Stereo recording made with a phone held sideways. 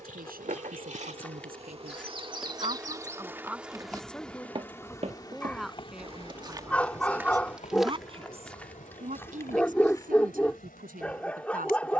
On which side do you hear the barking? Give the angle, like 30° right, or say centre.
10° left.